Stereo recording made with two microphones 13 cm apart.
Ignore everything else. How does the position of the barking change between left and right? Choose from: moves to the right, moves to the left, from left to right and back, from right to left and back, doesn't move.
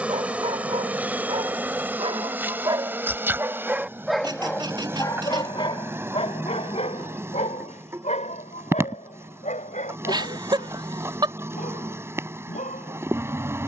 moves to the left.